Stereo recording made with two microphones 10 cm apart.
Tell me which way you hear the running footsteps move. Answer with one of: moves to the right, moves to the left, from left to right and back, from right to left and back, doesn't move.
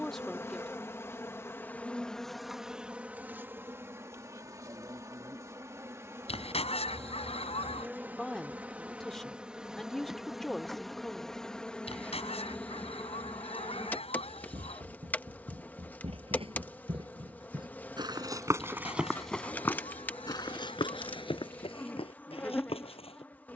moves to the left.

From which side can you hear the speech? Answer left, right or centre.
centre.